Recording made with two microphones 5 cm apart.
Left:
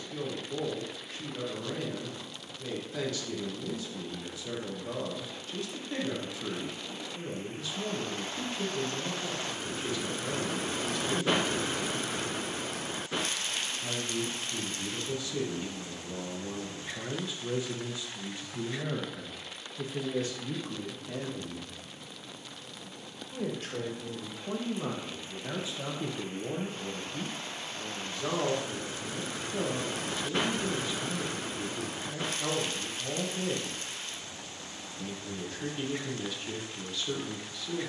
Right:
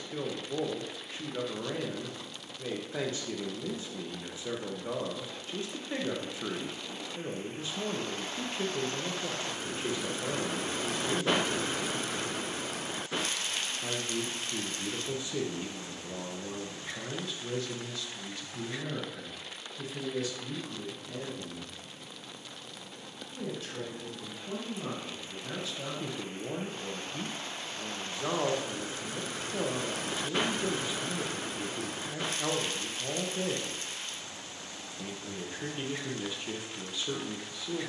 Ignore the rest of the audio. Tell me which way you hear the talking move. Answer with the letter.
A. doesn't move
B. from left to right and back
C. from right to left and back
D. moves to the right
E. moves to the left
C.